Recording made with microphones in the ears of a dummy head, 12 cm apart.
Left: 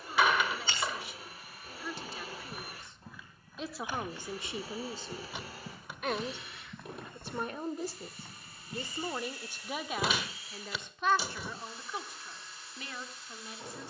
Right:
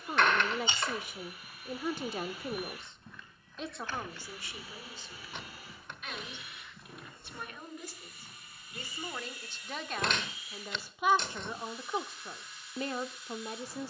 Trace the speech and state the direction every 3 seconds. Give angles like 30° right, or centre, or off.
40° right, 20° left, 30° left, centre, 30° right.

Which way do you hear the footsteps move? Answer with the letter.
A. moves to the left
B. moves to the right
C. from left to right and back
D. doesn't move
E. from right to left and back
A.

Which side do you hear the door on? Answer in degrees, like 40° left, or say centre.
10° left.